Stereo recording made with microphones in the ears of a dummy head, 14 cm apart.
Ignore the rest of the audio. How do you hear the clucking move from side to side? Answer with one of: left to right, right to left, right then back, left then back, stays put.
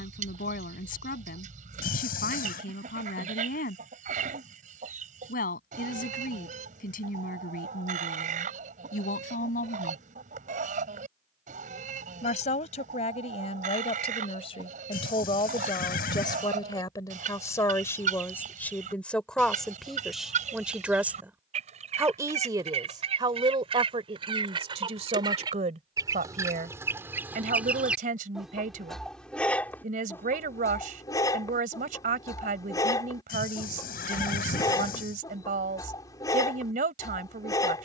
right to left.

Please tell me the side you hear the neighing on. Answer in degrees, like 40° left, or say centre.
60° left.